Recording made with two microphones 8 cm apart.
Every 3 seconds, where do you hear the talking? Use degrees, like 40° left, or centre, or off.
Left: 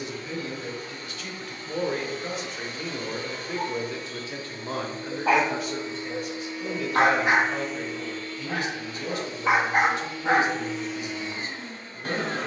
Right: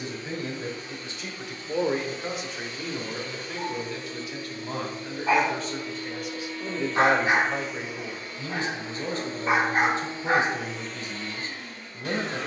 20° right, 20° left, 20° right, 30° right.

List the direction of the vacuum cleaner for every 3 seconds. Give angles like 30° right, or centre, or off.
40° left, 40° left, centre, 10° right.